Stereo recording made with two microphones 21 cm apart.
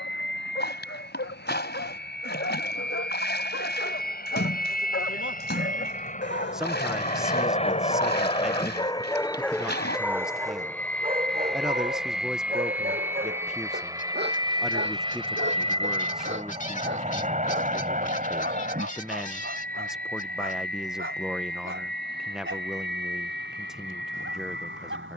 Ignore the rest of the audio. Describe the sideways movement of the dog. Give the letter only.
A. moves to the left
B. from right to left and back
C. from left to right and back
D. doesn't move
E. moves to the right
E.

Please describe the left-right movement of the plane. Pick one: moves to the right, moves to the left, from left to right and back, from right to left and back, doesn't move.
moves to the right.